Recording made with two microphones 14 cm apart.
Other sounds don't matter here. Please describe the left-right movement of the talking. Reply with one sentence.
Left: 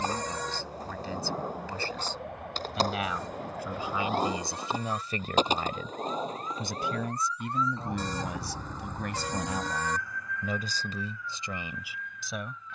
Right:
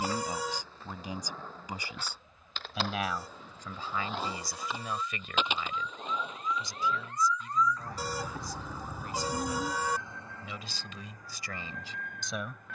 You can hear the talking move from right to left and back again.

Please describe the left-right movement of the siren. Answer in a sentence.
In this clip you hear the siren move from left to right.